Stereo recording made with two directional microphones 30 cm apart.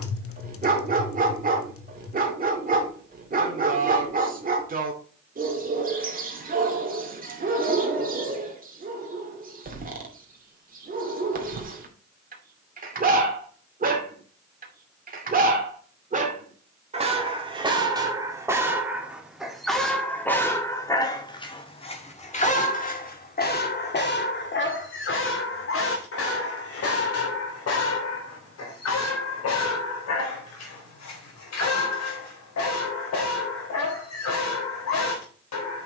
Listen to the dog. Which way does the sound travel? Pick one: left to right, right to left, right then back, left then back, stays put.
right to left.